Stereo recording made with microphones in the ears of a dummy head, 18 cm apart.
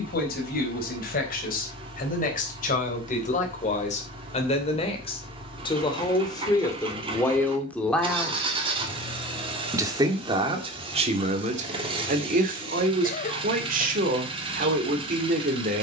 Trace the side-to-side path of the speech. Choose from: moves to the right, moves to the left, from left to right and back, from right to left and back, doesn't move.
moves to the right.